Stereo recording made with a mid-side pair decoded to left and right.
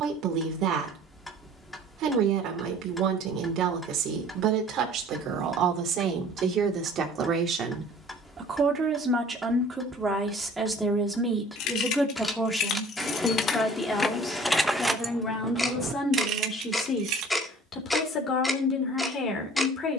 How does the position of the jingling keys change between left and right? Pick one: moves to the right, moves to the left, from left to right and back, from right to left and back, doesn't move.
moves to the right.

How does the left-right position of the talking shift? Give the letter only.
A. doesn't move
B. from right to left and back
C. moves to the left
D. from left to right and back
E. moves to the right
C.